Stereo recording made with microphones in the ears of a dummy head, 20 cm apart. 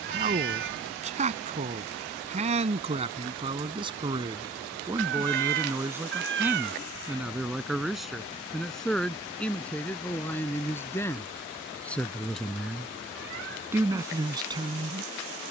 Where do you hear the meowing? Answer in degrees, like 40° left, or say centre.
60° right.